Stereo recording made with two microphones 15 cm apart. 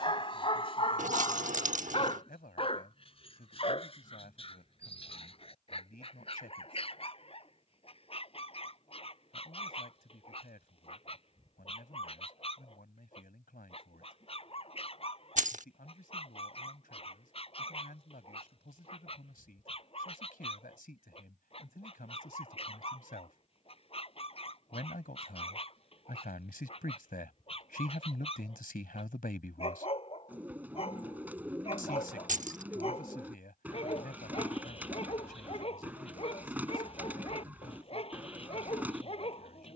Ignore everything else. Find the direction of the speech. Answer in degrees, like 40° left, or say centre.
80° left.